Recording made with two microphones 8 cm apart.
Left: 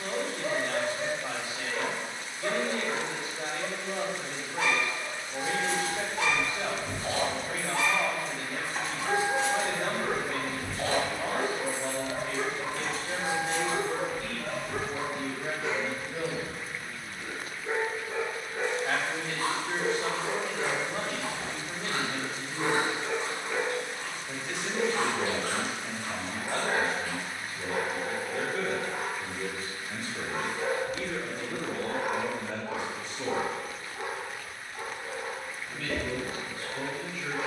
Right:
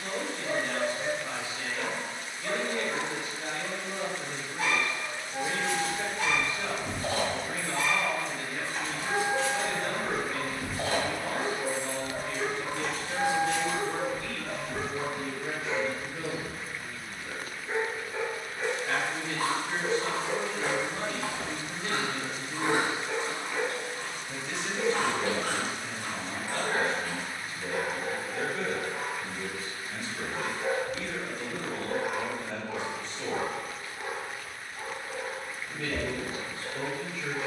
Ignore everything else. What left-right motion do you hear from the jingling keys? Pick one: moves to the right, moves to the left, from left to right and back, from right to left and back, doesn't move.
from right to left and back.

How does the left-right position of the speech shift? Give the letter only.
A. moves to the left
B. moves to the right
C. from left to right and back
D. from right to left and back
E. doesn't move
B.